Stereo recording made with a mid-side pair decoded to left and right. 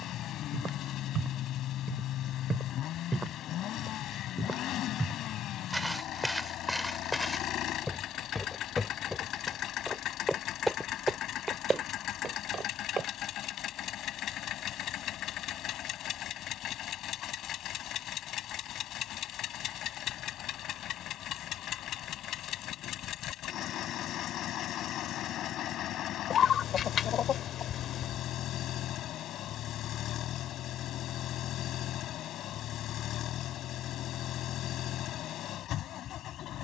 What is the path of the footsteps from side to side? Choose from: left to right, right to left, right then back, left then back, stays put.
left then back.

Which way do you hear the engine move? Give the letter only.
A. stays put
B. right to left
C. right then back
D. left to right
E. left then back
A.